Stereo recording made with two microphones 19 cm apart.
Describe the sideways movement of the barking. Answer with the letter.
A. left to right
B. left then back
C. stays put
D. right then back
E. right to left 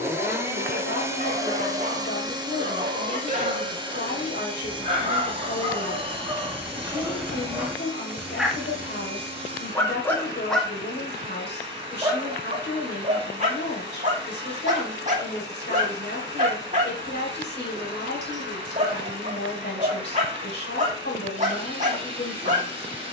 B.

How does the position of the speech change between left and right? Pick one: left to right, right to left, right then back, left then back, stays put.
stays put.